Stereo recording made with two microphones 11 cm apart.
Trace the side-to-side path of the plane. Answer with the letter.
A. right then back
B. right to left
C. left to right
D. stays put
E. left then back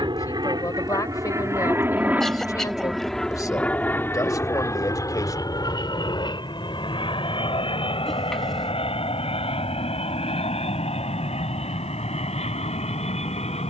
B.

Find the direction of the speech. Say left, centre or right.
left.